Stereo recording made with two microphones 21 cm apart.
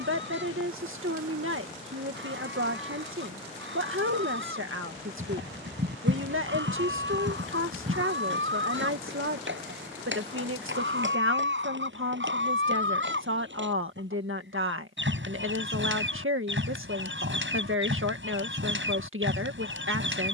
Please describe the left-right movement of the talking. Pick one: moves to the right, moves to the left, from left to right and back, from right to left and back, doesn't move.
doesn't move.